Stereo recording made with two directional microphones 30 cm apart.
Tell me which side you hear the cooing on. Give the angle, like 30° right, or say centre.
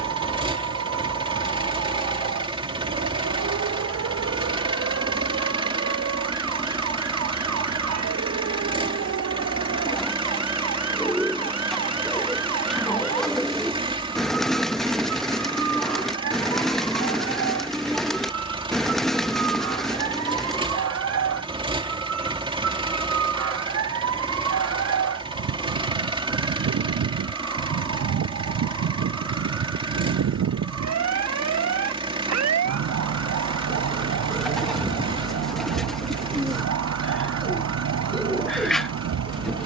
centre.